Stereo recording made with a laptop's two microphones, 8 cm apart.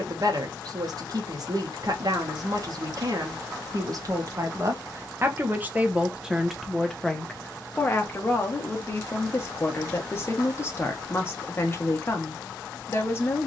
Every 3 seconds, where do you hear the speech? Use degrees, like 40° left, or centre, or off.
50° right, 40° right, 10° left, 30° left, 30° left.